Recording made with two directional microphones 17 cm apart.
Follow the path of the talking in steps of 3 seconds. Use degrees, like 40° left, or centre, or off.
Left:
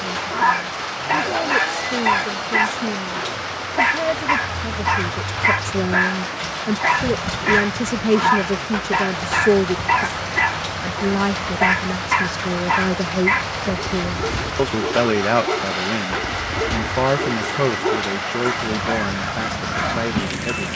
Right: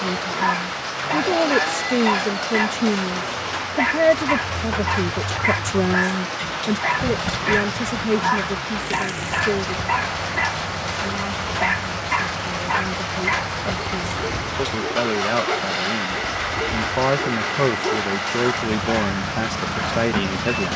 40° right, 30° right, 20° left, 50° left, 40° left, 10° left, 20° right.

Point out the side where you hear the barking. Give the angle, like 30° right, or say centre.
20° left.